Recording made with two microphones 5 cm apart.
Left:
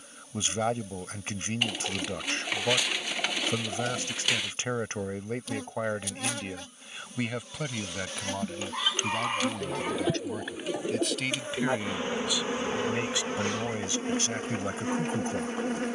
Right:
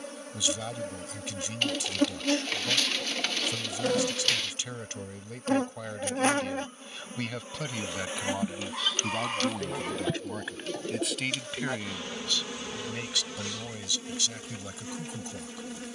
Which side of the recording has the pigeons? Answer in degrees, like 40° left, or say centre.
10° left.